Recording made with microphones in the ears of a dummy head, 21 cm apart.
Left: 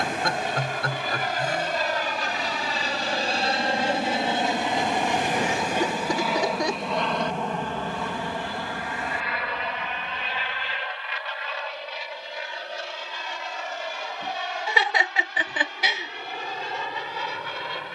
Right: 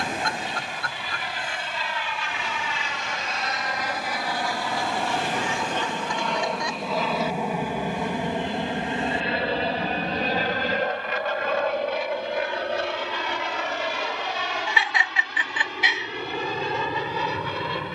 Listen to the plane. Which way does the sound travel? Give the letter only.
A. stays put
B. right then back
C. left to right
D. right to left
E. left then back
C.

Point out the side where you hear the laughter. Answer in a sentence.
In this clip you hear the laughter on the left.